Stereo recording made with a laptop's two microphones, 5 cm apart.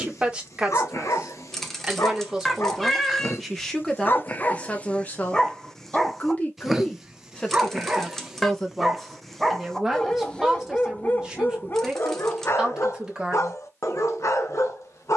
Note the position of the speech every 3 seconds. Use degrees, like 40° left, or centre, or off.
20° right, 20° left, 20° left, 10° right, 10° right.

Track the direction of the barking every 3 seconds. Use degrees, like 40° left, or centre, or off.
70° left, 30° left, 10° right, 20° left, 60° left.